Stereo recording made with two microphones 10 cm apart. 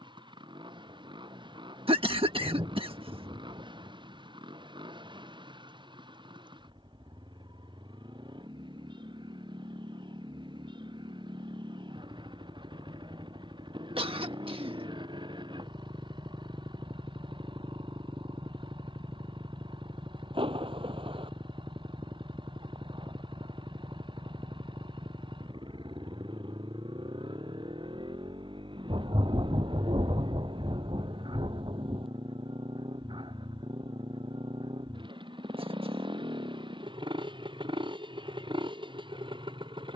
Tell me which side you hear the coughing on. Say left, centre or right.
right.